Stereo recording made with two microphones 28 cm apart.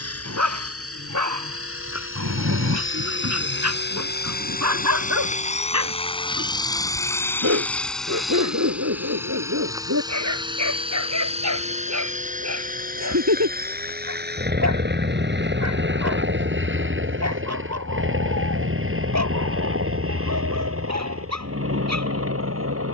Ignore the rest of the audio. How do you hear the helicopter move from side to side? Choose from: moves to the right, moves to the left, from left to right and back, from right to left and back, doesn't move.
moves to the right.